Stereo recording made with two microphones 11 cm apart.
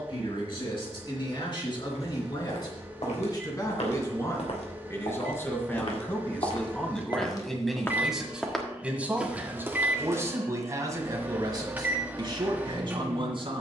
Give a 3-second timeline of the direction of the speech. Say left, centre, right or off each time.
left, left, centre, right, right.